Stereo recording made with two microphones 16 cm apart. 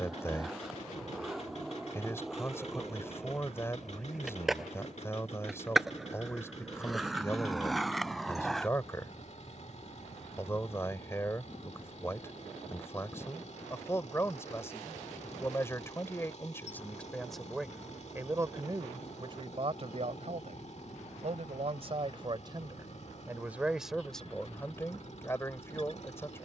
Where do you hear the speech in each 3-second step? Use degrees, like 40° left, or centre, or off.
20° left, 20° left, 20° left, 20° left, 20° left, 10° left, 30° right, 30° right, 10° left.